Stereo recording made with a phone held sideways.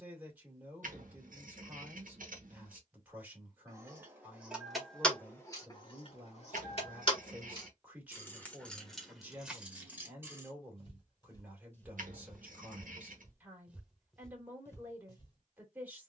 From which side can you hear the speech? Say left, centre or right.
centre.